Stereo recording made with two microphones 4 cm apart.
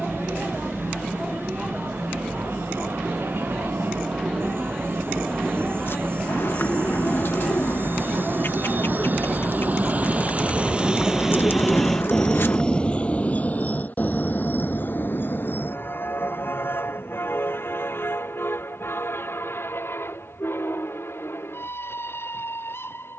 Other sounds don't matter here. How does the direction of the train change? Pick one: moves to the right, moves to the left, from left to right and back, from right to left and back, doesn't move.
moves to the left.